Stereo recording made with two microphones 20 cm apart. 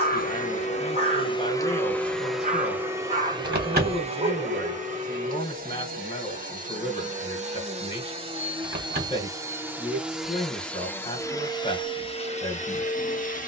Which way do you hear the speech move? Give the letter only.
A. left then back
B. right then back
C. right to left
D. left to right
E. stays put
E.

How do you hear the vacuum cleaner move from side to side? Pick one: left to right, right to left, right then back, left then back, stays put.
right then back.